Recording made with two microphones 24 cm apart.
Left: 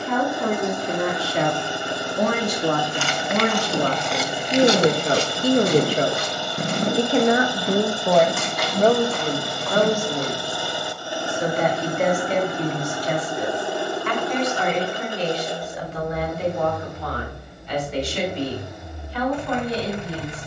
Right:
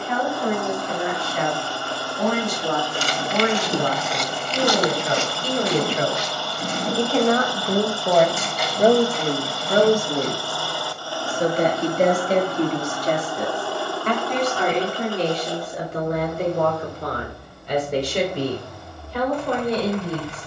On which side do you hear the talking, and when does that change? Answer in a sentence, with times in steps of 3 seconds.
You can hear the talking on the left from 0 s, in the centre from 6 s and on the right from 9 s.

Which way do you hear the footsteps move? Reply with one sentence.
You can hear the footsteps go from the right side to the left.